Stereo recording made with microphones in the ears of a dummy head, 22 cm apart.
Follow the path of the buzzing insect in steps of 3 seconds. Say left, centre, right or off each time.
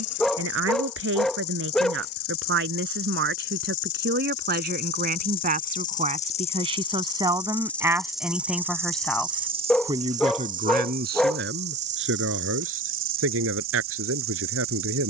left, left, centre, right, right.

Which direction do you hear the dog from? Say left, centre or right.
centre.